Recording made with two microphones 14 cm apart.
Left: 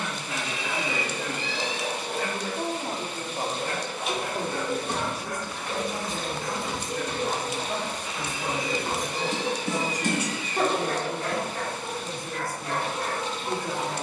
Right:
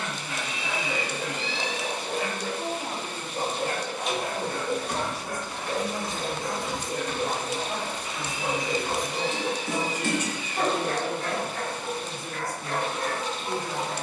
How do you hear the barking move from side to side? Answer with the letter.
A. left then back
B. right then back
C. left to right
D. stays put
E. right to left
B.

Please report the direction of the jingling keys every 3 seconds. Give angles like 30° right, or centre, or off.
off, 30° left, 60° left, 20° left, off.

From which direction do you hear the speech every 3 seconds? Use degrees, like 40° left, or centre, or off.
30° left, 30° left, 10° right, 30° right, 10° left.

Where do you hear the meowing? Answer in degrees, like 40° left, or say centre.
50° left.